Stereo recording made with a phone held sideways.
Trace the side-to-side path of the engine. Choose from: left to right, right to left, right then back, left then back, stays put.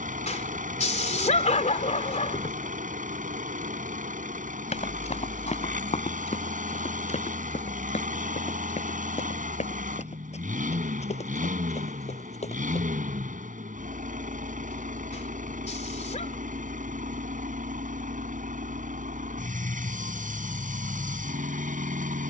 stays put.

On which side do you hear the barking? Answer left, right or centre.
left.